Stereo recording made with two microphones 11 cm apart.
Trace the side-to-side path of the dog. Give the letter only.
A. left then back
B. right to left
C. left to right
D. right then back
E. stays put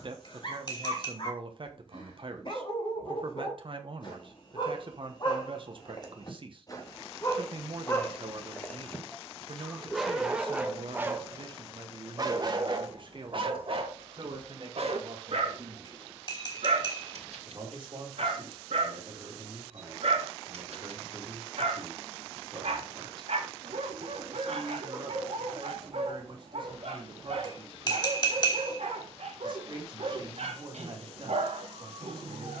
C.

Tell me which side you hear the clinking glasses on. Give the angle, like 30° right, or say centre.
40° left.